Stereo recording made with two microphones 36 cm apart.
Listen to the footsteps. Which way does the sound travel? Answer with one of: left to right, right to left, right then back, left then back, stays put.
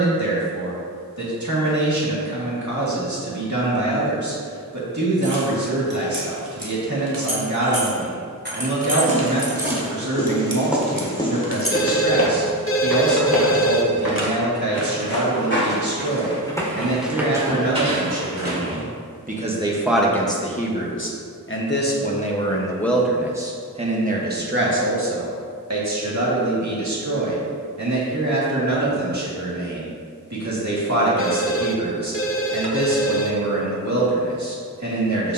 left then back.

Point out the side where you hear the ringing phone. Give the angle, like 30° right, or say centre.
30° left.